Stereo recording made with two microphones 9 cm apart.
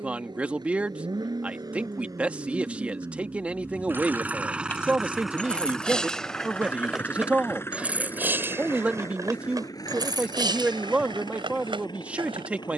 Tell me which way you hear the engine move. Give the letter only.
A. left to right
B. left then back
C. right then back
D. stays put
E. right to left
E.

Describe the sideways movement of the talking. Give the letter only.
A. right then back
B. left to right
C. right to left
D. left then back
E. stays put
E.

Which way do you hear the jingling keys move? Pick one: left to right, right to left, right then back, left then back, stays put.
left to right.